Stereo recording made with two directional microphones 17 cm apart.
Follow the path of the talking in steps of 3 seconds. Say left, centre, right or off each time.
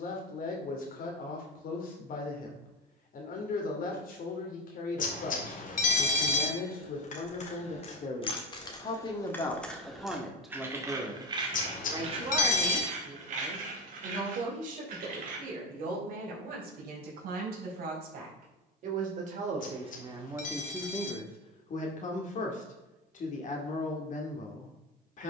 left, left, left, centre, right, right, right, left, left.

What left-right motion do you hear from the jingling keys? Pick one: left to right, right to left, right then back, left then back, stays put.
left to right.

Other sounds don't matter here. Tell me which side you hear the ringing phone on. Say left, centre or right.
left.